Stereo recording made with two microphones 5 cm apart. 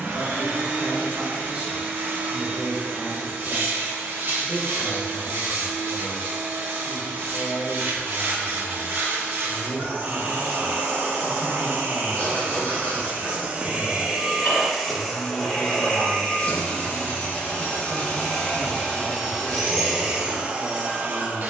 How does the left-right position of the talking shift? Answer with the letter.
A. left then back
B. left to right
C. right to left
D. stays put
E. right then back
A.